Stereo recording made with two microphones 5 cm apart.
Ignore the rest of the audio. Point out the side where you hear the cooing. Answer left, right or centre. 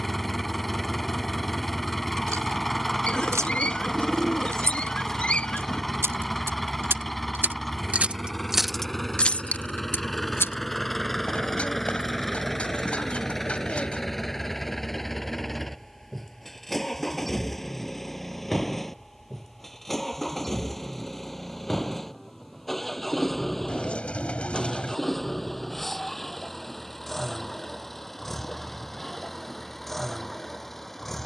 left.